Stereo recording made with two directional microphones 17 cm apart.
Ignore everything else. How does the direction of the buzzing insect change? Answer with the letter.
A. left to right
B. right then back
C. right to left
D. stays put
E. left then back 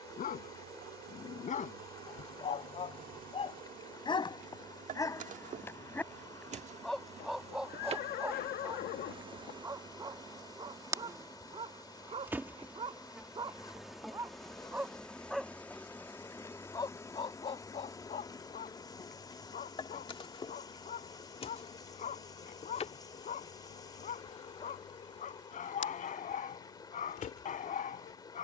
C.